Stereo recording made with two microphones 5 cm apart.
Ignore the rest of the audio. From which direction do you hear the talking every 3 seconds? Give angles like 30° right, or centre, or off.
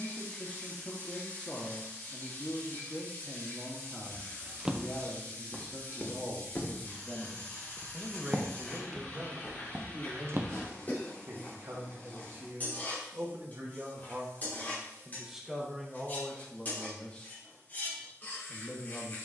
30° left, 30° left, centre, 50° right, 40° right, 10° left, 20° left.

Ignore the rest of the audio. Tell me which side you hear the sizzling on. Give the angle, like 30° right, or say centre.
30° left.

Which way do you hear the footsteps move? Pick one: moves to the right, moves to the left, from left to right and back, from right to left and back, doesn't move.
from right to left and back.